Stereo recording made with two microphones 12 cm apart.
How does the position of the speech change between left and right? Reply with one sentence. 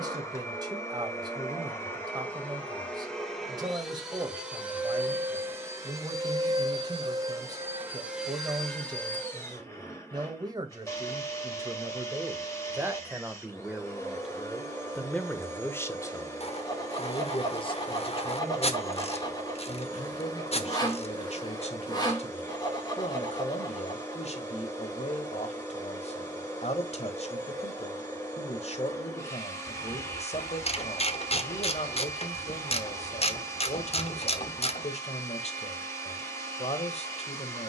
You can hear the speech travel towards the left.